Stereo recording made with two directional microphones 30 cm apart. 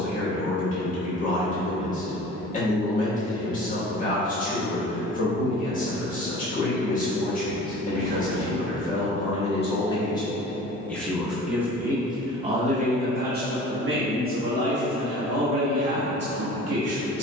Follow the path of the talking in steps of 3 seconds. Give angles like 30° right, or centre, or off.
30° left, 30° left, 30° left, 10° left, 30° right, 50° right.